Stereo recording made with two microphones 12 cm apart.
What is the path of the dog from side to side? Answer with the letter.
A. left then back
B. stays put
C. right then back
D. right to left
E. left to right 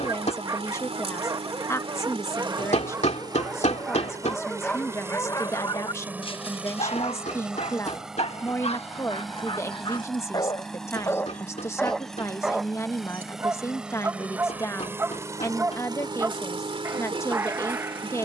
A.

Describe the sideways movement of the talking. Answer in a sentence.
In this clip you hear the talking stay in one place.